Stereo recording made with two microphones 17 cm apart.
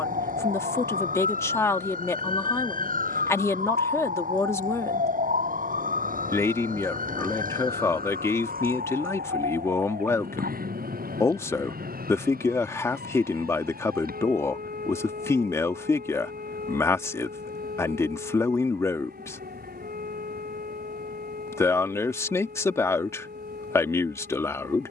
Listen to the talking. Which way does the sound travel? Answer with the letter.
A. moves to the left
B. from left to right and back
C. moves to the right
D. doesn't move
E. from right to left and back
D.